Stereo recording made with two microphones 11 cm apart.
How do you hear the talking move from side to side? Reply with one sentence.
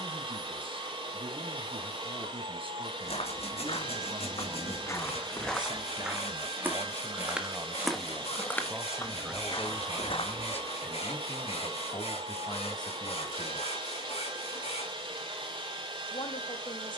You can hear the talking move from right to left.